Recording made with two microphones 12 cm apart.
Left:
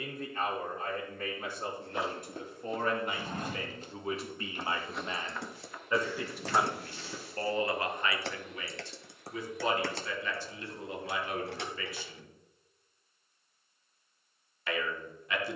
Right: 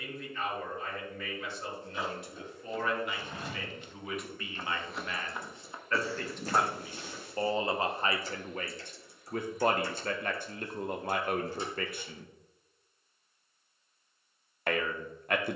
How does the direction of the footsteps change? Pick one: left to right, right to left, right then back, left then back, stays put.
left to right.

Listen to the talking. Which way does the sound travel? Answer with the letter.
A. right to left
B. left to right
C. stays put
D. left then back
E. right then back
B.